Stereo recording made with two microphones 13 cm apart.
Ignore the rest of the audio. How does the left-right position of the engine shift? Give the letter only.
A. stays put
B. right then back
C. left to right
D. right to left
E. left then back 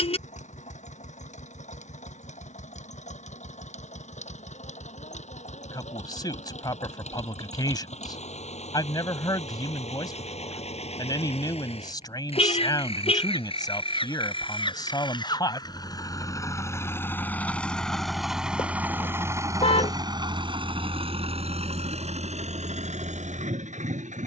C.